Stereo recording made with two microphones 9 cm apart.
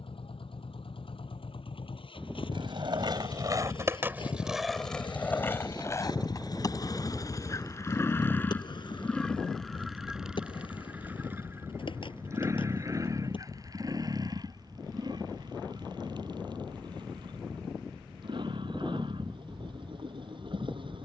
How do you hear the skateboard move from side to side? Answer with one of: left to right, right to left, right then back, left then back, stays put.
right to left.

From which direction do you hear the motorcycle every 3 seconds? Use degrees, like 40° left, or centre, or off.
80° left, 60° left, 30° left, 10° right, 40° right, 50° right, 60° right.